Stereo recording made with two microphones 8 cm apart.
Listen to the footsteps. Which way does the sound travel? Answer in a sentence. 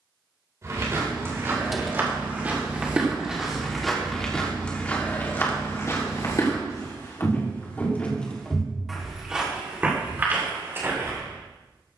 You can hear the footsteps go left and come back.